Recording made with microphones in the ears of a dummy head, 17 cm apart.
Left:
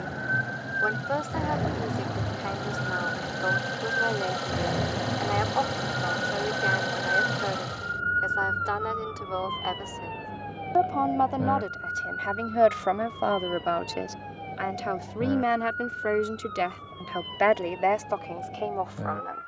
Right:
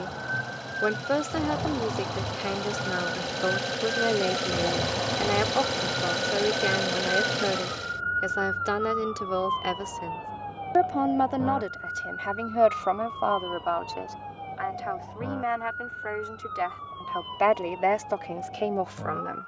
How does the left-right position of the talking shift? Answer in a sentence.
In this clip you hear the talking move from right to left and back again.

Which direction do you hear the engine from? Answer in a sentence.
You can hear the engine on the right.